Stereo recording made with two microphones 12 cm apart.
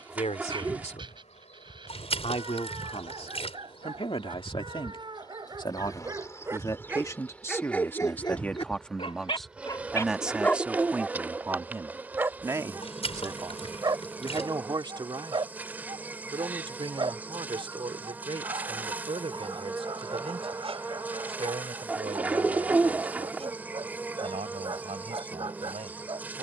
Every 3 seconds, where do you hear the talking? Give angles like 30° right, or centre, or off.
60° left, 50° left, 20° left, 10° right, 30° right, 40° right, 50° right, 60° right, 60° right.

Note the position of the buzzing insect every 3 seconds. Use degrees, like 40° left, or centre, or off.
70° left, 40° left, 10° left, 10° right, 10° right, 10° right, 10° right, 10° right, 10° right.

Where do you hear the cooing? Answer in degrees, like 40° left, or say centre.
10° right.